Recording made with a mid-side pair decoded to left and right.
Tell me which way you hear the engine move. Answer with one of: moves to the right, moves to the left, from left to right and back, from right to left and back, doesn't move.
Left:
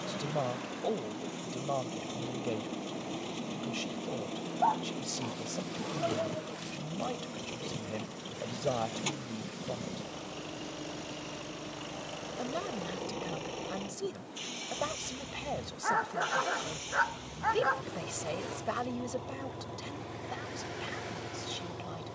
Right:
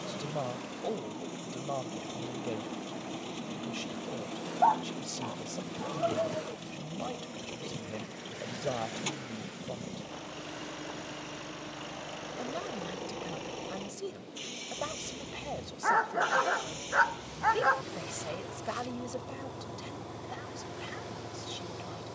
doesn't move.